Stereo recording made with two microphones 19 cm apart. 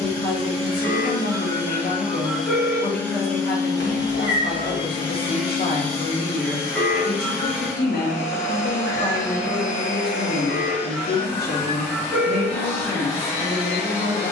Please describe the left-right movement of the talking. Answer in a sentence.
In this clip you hear the talking stay put.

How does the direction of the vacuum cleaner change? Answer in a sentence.
In this clip you hear the vacuum cleaner move from right to left.